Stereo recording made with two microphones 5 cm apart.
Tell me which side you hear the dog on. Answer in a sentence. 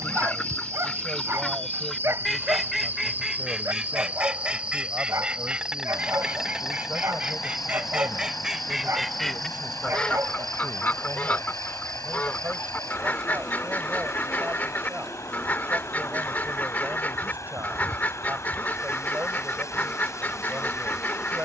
You can hear the dog on the right.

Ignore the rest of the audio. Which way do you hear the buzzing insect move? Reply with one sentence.
In this clip you hear the buzzing insect travel towards the left.